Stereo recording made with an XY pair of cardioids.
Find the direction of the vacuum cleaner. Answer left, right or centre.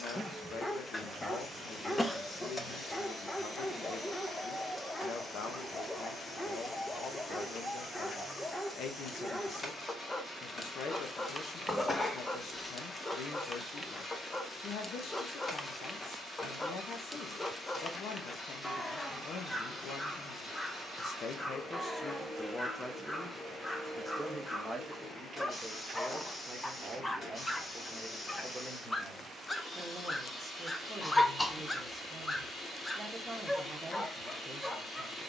left.